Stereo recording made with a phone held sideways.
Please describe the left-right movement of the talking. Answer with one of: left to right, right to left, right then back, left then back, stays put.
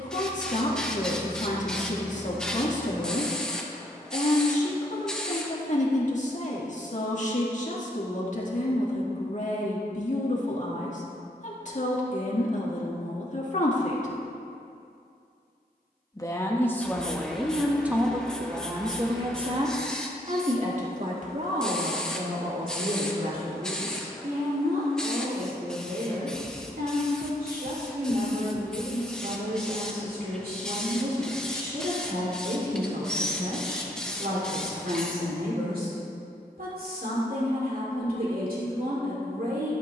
left to right.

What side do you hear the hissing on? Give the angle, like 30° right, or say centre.
centre.